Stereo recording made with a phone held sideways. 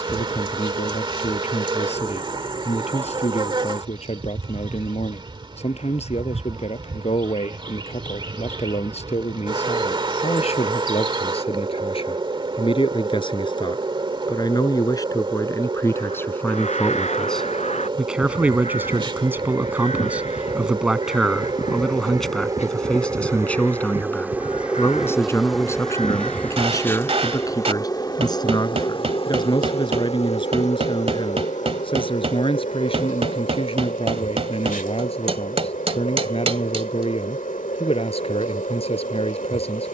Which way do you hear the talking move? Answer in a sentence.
In this clip you hear the talking move from left to right and back again.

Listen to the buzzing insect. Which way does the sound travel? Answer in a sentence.
You can hear the buzzing insect go from the right side to the left.